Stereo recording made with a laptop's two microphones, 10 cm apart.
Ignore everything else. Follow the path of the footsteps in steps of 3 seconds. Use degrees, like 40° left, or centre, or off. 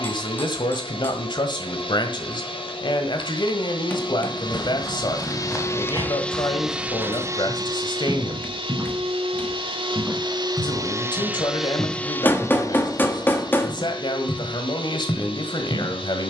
off, 30° left, 10° right, centre, 20° left, 40° left.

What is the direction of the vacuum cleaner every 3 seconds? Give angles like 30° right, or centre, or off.
60° left, 50° left, 30° right, 40° right, 50° left, 60° left.